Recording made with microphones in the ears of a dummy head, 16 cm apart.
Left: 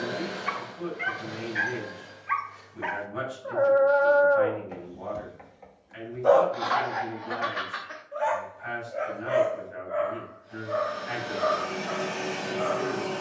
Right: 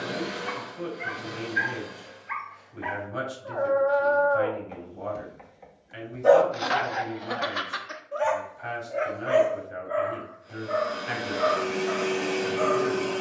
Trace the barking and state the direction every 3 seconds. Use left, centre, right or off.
left, left, right, right, right.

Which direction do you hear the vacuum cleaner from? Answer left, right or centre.
right.